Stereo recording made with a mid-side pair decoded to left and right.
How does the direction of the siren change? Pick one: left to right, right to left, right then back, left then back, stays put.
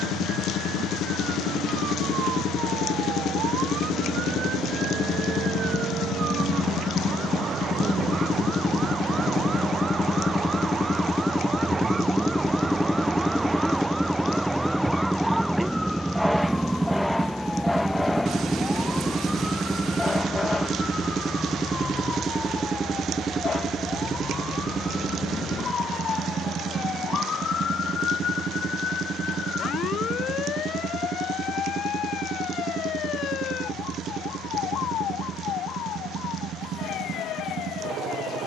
right to left.